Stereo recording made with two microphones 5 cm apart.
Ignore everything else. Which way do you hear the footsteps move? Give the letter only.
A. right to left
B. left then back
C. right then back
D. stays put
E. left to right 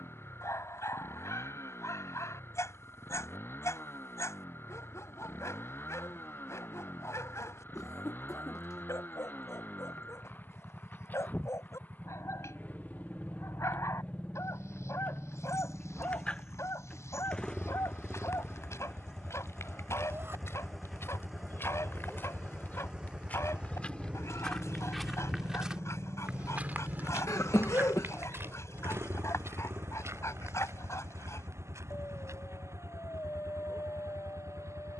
E.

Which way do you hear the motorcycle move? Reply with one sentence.
In this clip you hear the motorcycle move to the right.